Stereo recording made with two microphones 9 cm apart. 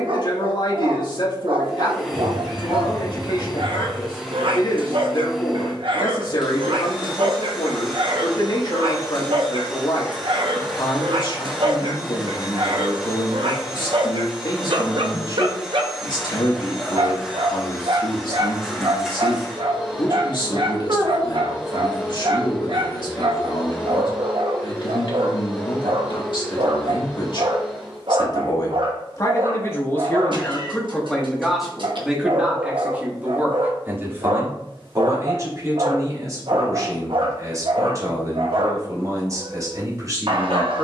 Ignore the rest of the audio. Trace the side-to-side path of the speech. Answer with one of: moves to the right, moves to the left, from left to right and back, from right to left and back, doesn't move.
moves to the right.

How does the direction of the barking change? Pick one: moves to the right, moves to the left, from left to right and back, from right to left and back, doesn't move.
doesn't move.